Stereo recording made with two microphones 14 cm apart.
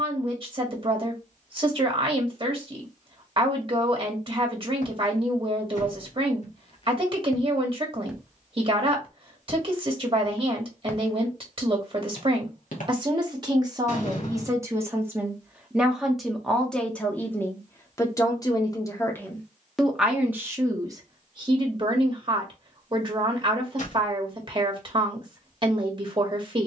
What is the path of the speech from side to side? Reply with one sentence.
You can hear the speech go left and come back.